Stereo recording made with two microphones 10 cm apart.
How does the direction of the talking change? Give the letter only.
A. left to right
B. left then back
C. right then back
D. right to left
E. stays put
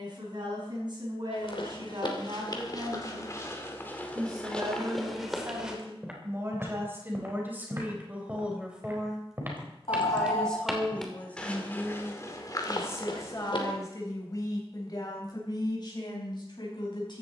D.